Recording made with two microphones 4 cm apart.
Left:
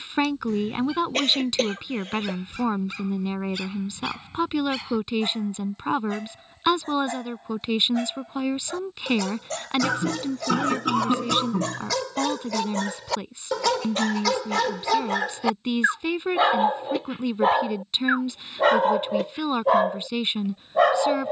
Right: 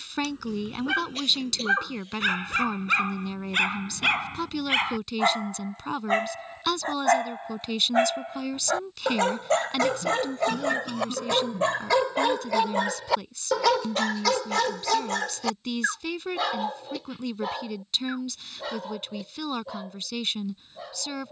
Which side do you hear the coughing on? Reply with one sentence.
In this clip you hear the coughing on the left.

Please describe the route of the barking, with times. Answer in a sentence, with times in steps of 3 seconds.
You can hear the barking on the right from 0 s, in the centre from 12 s and on the left from 15 s.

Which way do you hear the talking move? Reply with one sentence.
In this clip you hear the talking stay put.